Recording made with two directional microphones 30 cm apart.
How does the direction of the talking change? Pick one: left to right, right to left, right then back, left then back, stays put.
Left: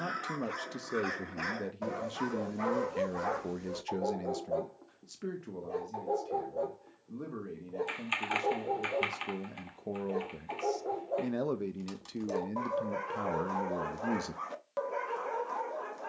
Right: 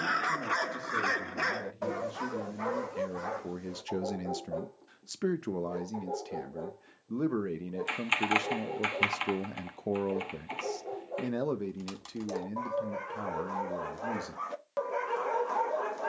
right then back.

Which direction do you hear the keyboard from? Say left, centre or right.
right.